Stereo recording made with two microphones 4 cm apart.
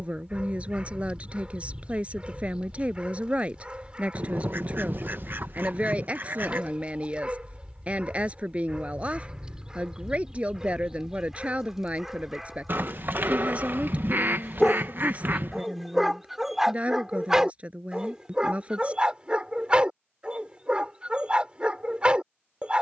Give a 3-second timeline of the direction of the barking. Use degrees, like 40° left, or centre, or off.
30° right, 30° right, 30° right, 20° right, centre, 10° right, 20° right, 30° right.